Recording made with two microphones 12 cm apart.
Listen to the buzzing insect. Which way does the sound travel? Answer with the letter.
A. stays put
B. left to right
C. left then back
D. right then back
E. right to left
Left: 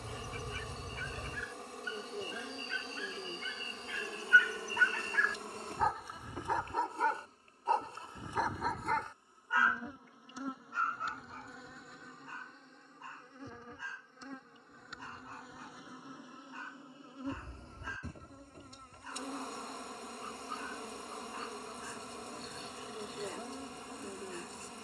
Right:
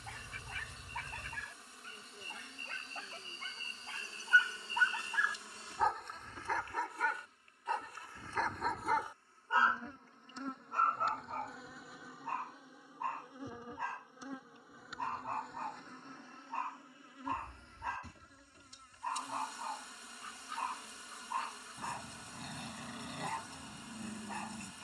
D.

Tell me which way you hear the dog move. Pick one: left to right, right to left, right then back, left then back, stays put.
left then back.